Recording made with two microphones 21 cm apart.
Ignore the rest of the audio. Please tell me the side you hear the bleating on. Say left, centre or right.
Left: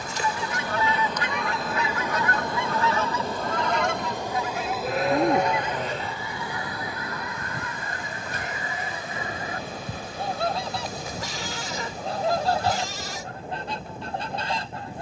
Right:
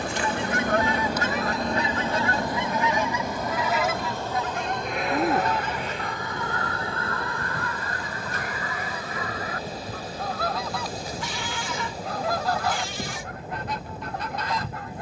left.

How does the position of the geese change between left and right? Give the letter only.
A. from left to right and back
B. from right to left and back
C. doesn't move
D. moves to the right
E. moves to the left
E.